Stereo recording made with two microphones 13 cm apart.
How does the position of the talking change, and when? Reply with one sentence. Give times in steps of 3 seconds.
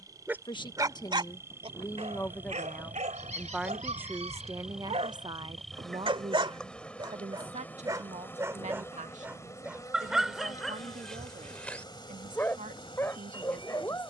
You can hear the talking on the left from 0 s and on the right from 3 s.